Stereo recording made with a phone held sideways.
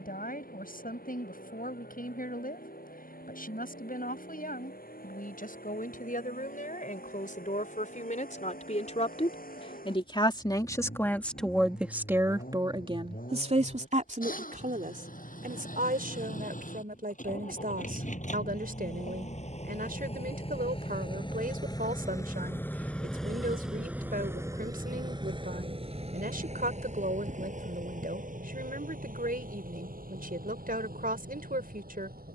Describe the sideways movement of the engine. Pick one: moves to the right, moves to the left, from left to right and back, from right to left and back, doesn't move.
moves to the right.